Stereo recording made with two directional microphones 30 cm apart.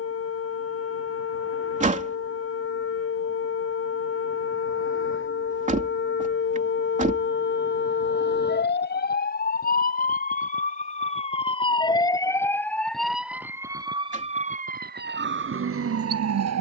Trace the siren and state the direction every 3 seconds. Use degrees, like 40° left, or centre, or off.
50° left, 50° left, 40° left, 30° left, 10° right, 50° right.